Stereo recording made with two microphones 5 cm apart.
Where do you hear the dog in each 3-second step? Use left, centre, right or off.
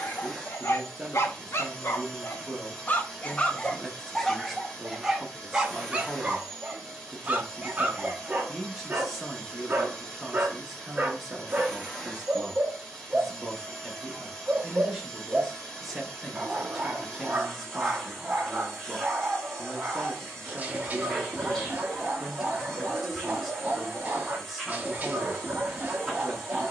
left, centre, right, right, right, right, right, right, right.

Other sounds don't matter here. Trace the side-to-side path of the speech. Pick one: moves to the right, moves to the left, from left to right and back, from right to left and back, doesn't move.
doesn't move.